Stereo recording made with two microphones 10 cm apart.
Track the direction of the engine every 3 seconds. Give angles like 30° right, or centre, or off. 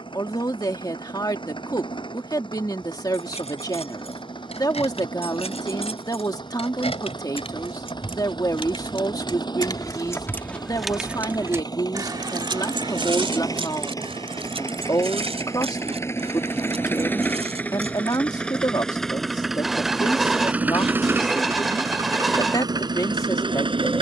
50° left, 50° left, 50° left, 40° left, 30° left, 20° left, centre, 40° right.